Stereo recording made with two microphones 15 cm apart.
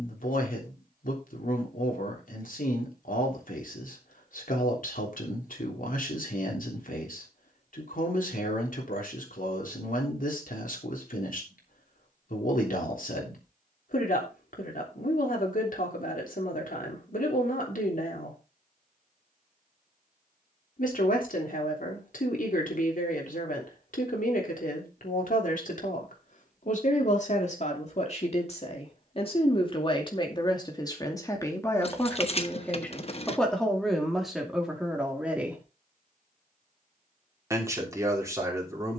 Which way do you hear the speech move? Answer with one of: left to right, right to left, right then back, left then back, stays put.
left to right.